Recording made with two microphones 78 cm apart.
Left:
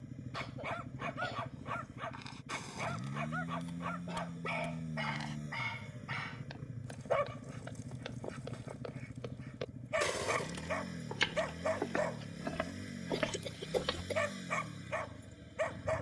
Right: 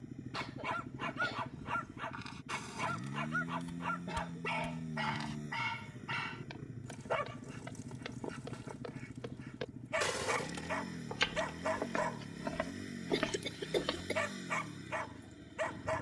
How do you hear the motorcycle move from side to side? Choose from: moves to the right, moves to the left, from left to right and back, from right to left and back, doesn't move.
doesn't move.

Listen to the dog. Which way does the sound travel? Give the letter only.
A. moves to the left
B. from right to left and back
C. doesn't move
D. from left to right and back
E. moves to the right
C.